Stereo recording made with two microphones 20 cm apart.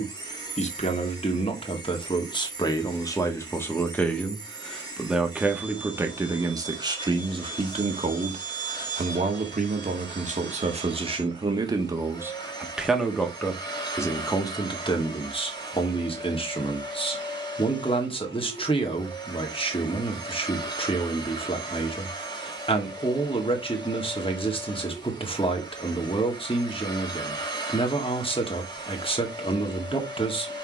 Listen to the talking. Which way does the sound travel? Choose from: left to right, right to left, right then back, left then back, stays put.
right then back.